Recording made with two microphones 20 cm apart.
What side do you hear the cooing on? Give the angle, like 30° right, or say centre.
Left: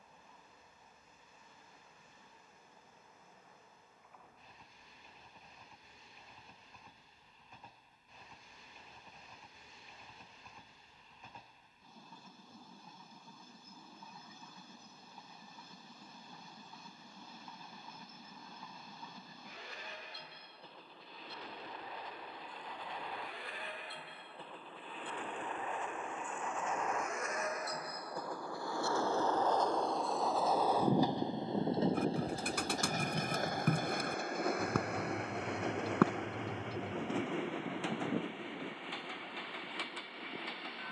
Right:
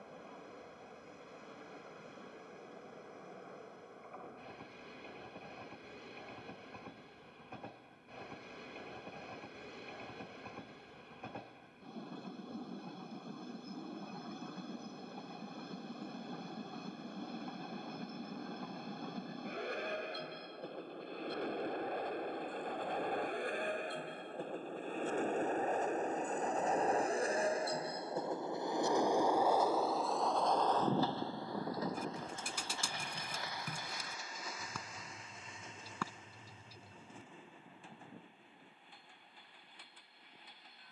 60° left.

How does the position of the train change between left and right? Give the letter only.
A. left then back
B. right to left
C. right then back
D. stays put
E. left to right
B.